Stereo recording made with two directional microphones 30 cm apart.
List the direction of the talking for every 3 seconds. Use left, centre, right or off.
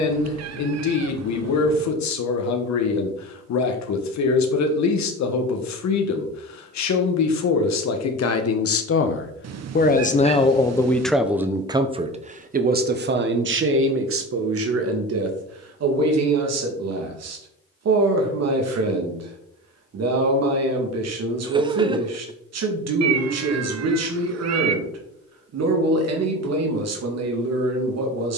left, left, left, centre, right, right, right, right, right, right.